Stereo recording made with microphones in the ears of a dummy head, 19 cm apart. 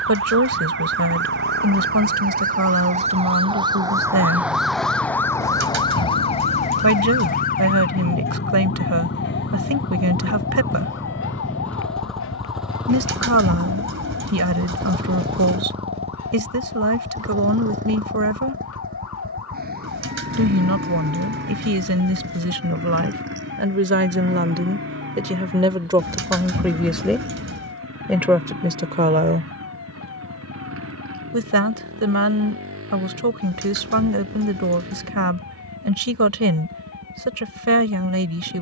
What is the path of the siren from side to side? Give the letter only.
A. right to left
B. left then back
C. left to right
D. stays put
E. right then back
A.